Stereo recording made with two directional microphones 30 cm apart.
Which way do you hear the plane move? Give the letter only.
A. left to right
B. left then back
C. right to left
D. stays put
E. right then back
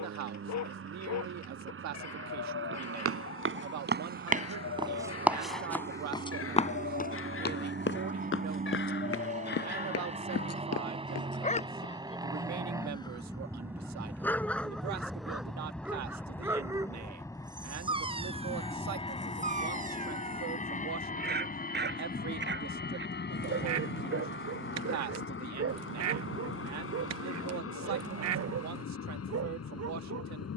C.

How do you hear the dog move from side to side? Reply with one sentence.
In this clip you hear the dog travel towards the right.